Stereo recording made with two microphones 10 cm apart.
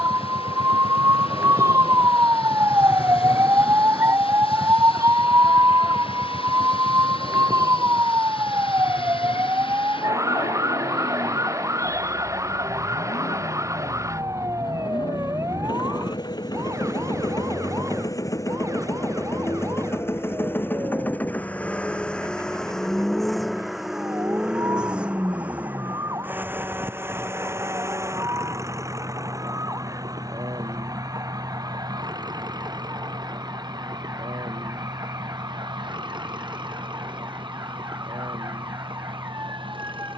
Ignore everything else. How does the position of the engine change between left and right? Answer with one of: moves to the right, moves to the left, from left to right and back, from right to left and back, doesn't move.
moves to the right.